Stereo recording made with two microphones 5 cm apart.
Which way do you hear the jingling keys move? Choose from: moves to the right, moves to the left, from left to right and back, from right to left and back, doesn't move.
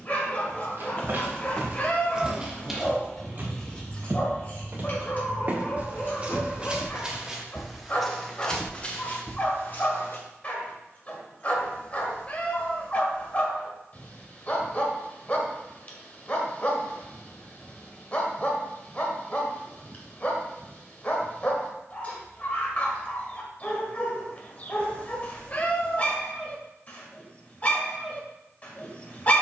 moves to the left.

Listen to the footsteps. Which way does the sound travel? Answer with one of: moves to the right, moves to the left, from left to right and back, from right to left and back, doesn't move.
from left to right and back.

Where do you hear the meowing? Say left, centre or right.
left.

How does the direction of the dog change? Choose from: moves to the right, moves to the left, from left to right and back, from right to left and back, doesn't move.
doesn't move.